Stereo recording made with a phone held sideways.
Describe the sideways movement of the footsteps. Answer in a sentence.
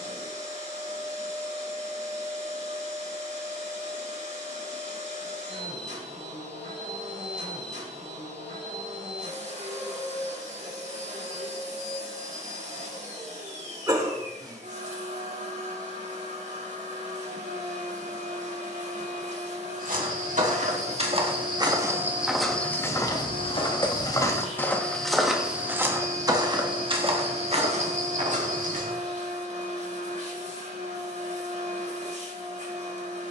You can hear the footsteps go left and come back.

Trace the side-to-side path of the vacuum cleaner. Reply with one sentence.
You can hear the vacuum cleaner stay in one place.